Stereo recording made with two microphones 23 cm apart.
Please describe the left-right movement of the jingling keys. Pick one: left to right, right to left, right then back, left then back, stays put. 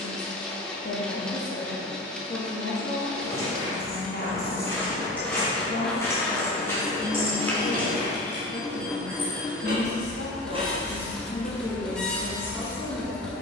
right then back.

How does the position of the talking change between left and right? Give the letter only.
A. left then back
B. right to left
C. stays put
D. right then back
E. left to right
C.